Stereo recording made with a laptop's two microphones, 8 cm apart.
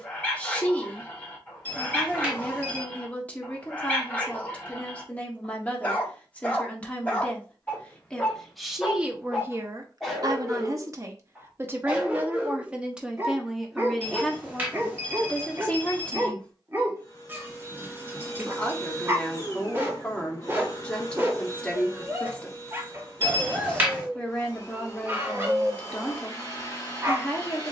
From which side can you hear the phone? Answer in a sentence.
In this clip you hear the phone on the right.